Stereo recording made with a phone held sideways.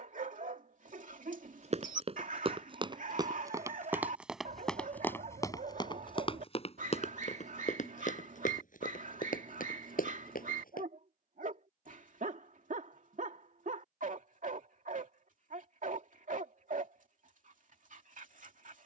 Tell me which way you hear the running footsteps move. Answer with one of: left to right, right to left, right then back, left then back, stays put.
right to left.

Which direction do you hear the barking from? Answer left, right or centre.
right.